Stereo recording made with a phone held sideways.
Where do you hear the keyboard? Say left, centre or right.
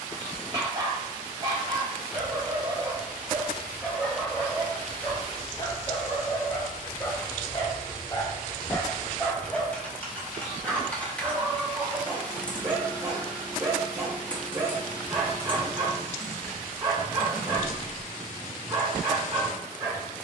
centre.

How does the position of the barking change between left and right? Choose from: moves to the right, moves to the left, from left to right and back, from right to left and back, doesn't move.
from right to left and back.